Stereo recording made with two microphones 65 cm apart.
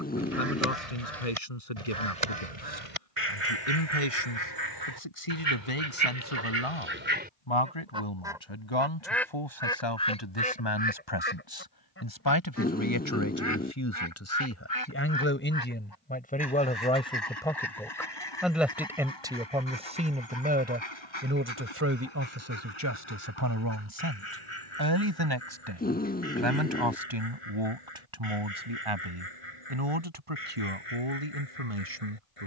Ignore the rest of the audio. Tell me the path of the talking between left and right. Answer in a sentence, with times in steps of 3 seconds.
In this clip you hear the talking on the left from 0 s, in the centre from 15 s and on the right from 21 s.